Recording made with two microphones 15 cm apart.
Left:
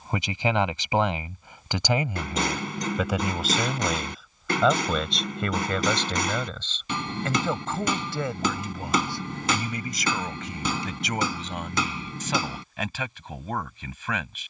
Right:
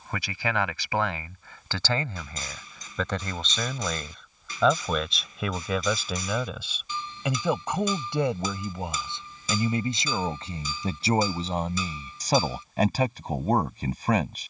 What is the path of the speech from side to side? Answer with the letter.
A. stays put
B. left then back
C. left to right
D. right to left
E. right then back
C.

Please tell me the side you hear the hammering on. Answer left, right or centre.
left.